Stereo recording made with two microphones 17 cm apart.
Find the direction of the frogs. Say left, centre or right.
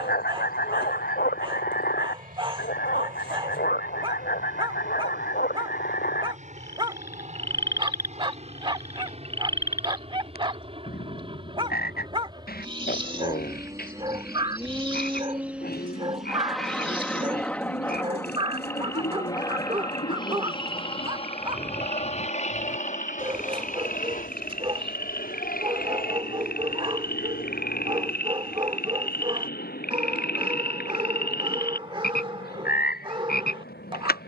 left.